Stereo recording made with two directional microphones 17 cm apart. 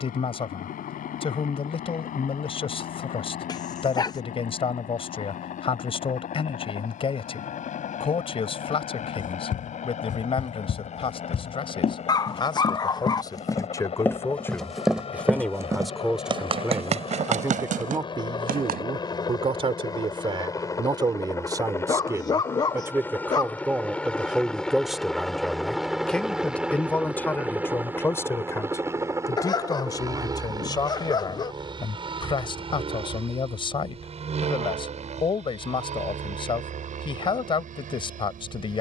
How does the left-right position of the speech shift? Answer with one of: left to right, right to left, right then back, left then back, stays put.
right then back.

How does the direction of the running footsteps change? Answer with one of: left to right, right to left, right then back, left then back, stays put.
left to right.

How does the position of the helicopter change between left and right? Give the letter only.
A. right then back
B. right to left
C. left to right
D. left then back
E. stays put
C.